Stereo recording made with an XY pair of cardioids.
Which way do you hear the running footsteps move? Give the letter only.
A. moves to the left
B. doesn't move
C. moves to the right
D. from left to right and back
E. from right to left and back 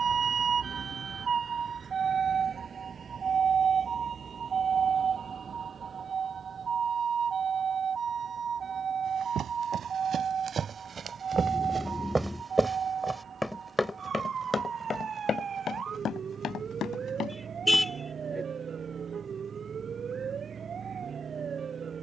A.